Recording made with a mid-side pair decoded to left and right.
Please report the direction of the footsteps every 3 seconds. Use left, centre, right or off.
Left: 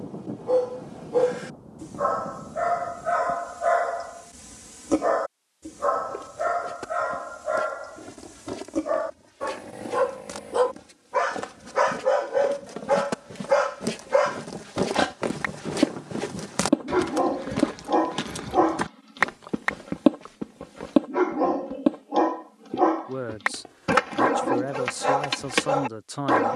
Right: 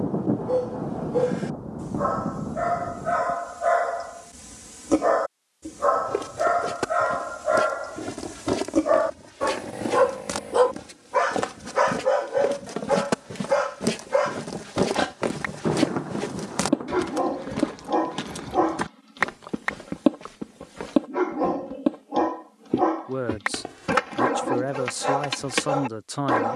off, off, right, right, right, centre, centre, right, off.